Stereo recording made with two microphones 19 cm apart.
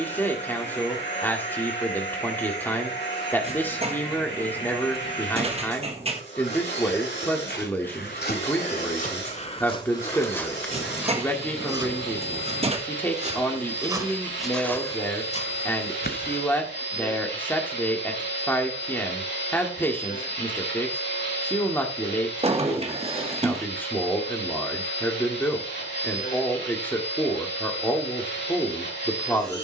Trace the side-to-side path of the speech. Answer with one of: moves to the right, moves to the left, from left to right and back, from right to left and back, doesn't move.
doesn't move.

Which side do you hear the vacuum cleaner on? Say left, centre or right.
left.